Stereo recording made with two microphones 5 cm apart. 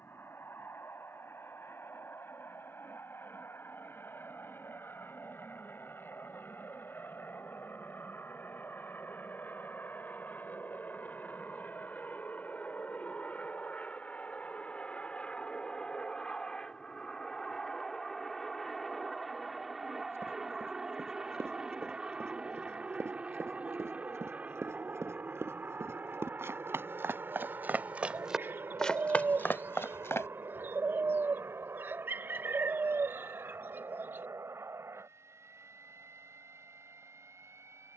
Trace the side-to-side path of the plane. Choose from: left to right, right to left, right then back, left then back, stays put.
left to right.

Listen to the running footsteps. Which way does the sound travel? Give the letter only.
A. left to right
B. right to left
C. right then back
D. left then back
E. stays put
B.